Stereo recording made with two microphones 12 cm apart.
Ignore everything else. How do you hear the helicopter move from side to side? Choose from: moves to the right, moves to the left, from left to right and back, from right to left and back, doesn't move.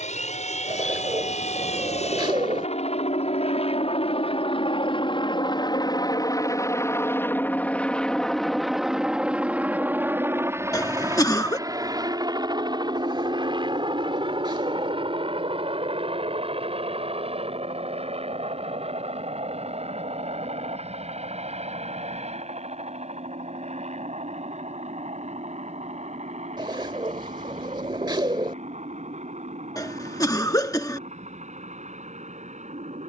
moves to the right.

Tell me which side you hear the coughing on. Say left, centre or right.
left.